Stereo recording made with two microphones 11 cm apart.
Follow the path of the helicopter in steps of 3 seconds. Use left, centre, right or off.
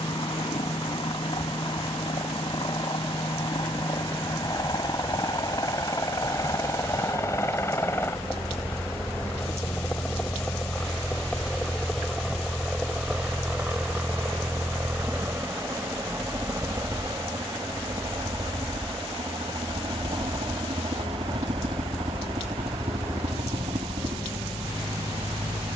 left, left, left, centre, centre, right, right, right, right.